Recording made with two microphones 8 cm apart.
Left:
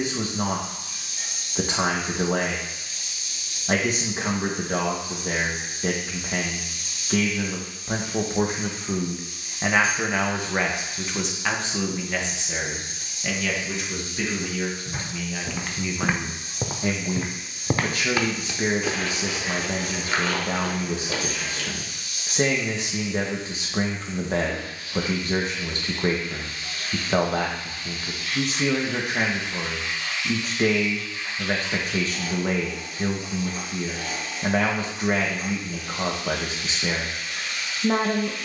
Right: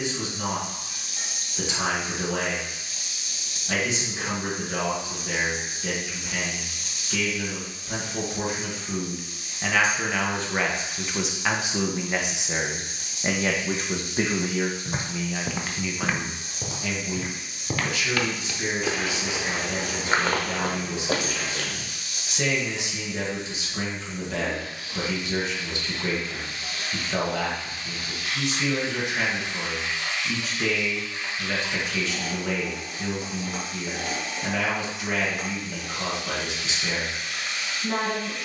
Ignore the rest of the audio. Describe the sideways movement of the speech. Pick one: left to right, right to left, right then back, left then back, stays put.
right then back.